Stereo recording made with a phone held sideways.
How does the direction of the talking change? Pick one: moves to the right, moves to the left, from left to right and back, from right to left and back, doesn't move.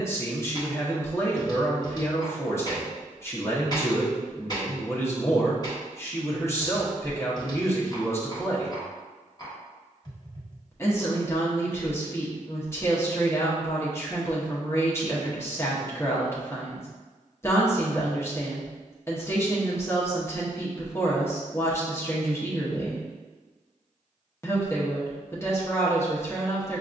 doesn't move.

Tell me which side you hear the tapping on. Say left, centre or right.
left.